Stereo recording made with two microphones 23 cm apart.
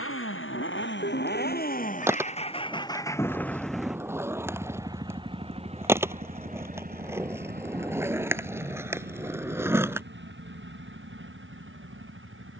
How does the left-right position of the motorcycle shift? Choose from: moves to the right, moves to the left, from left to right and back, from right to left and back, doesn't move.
moves to the right.